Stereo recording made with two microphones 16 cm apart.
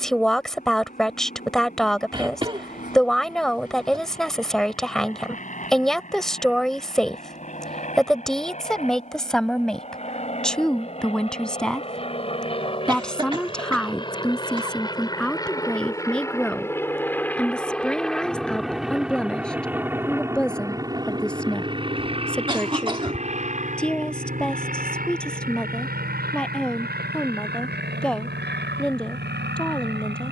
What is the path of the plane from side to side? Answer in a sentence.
In this clip you hear the plane travel towards the right.